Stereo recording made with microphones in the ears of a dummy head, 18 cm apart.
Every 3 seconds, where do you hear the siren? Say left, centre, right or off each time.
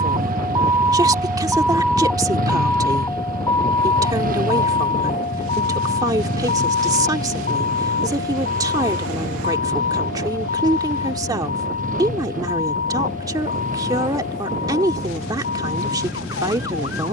centre, left, left, left, left, left.